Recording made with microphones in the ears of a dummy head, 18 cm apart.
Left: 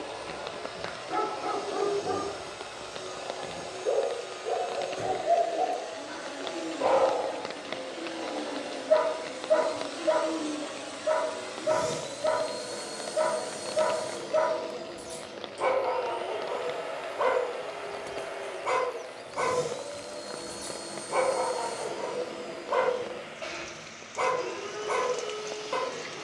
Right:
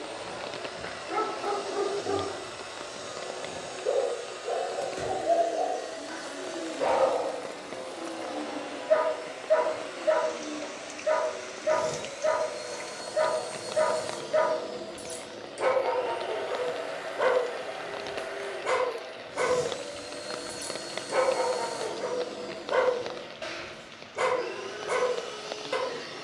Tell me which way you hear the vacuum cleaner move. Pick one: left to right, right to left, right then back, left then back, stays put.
left then back.